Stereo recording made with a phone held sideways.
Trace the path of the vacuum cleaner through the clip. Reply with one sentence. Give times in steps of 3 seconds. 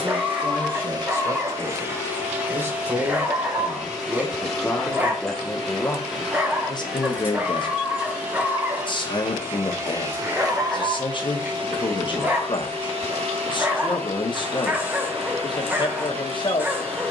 You can hear the vacuum cleaner on the right from 0 s, in the centre from 3 s and on the right from 9 s.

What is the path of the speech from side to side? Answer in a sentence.
In this clip you hear the speech move to the left.